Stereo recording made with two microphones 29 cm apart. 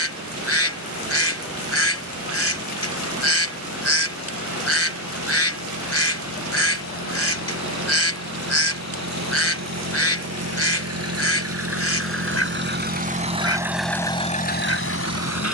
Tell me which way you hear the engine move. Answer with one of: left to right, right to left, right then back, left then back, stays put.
right to left.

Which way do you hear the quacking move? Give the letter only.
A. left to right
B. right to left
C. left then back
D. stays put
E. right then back
D.